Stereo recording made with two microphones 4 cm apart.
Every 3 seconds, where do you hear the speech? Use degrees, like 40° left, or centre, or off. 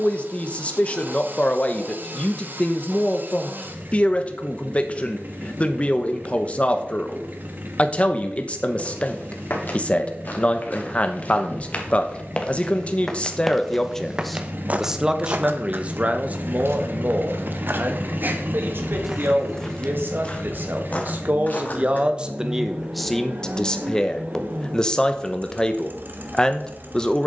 30° left, 30° left, 30° left, 30° left, 20° left, 40° right, 60° right, 10° right, 20° left.